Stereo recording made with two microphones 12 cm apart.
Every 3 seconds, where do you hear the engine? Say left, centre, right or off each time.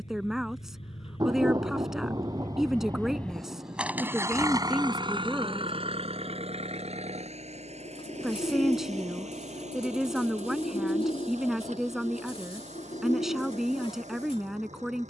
left, right, right, right, right.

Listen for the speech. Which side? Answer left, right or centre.
centre.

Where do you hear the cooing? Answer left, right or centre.
left.